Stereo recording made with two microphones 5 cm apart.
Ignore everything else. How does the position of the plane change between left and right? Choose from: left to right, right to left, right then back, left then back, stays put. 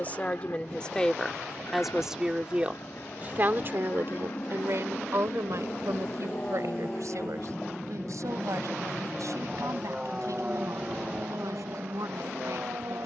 left to right.